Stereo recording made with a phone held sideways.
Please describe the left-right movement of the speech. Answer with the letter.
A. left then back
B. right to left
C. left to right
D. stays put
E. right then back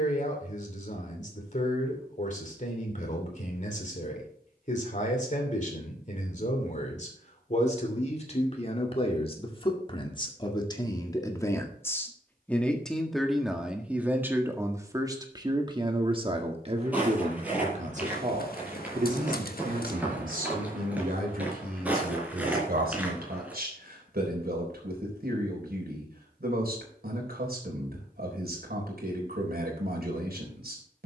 C.